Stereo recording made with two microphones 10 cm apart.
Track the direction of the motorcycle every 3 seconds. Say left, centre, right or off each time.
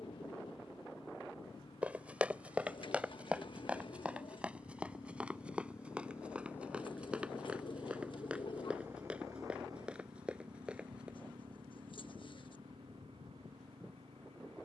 left, left, centre, right, right.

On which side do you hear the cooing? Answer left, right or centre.
left.